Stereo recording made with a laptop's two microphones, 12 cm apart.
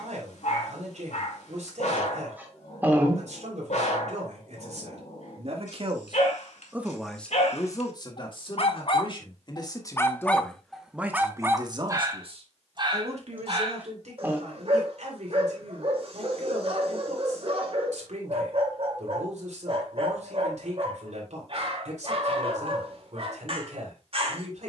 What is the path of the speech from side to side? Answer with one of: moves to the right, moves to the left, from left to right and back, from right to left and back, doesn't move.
from right to left and back.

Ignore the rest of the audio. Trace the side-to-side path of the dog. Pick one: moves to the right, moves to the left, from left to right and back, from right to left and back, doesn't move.
moves to the right.